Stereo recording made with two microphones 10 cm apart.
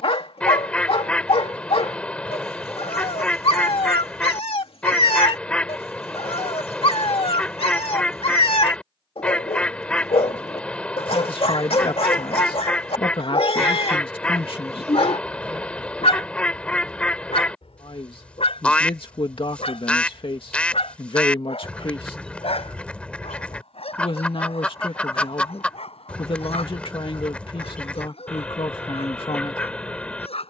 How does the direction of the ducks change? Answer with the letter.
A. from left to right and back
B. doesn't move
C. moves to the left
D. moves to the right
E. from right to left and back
B.